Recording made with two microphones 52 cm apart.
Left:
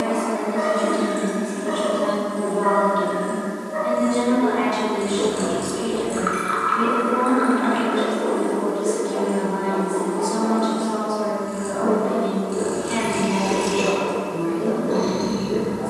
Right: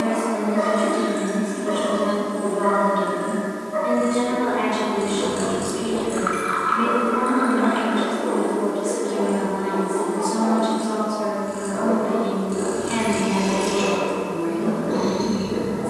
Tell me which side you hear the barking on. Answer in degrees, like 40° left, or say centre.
30° right.